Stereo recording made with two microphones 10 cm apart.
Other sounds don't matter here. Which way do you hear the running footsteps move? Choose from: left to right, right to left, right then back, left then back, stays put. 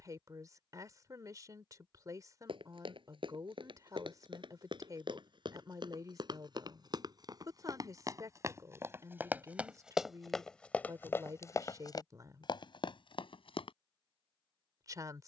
right to left.